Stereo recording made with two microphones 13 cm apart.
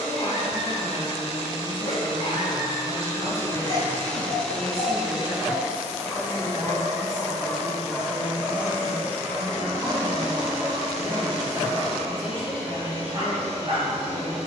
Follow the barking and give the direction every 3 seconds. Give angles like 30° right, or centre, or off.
40° left, 40° left, centre, 30° right, 40° right.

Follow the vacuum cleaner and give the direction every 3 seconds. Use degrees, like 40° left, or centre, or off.
40° left, 10° left, 30° right, 50° right, 60° right.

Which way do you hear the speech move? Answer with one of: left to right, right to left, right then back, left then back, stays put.
right then back.